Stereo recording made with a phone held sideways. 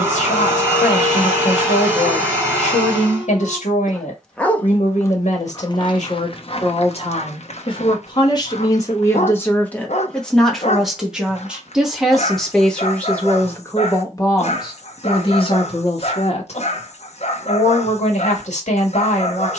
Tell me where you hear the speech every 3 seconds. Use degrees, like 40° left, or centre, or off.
60° left, 60° left, 40° left, centre, 20° left, 50° left, 60° left.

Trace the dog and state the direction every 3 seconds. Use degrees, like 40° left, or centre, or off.
40° left, 10° left, 50° left, 60° left, 60° left, 60° left, 60° left.